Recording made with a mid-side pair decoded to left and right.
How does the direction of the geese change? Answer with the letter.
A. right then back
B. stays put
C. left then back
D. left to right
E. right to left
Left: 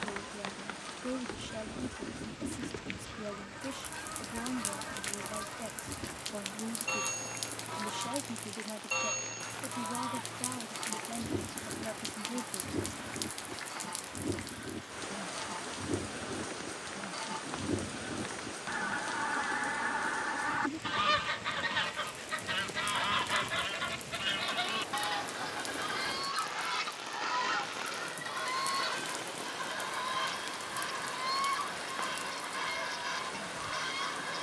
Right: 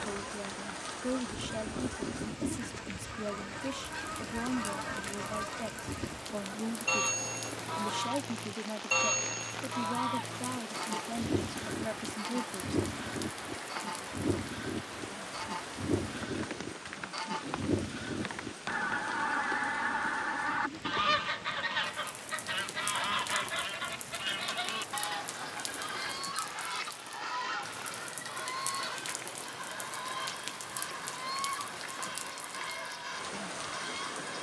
E.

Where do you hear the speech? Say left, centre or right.
right.